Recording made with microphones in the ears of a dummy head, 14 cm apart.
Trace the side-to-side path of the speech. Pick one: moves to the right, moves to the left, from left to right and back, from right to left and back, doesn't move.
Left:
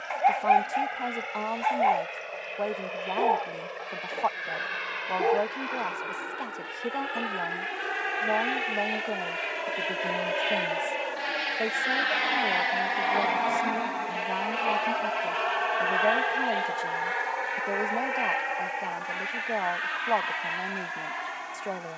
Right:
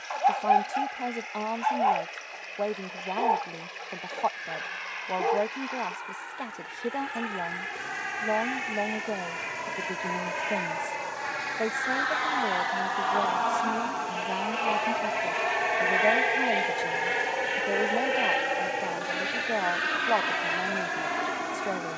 doesn't move.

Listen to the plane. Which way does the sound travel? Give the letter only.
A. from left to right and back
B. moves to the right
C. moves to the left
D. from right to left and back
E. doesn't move
B.